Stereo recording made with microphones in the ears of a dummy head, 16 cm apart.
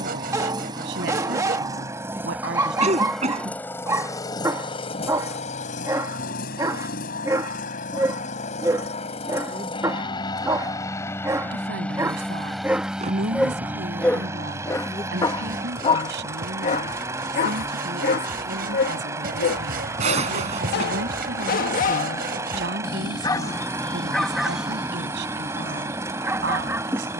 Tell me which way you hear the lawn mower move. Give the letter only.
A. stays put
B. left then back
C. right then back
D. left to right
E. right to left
B.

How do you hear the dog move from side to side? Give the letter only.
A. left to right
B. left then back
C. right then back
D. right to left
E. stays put
B.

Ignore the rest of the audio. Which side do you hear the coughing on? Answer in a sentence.
You can hear the coughing on the right.